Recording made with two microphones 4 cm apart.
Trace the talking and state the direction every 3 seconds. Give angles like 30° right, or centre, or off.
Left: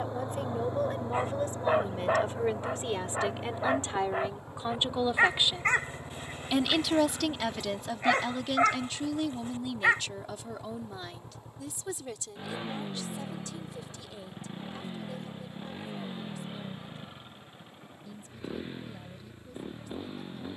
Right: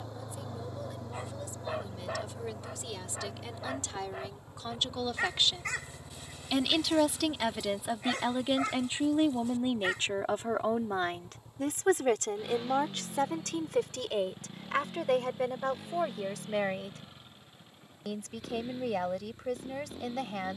40° left, 30° left, 10° right, 40° right, 70° right, 80° right, 80° right.